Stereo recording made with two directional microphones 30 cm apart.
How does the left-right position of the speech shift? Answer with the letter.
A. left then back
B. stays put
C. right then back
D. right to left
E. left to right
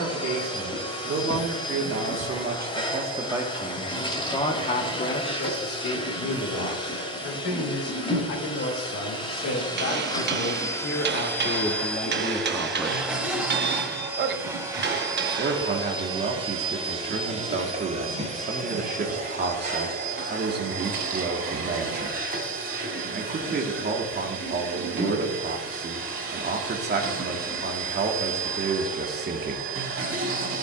A.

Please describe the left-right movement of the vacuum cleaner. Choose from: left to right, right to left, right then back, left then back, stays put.
left to right.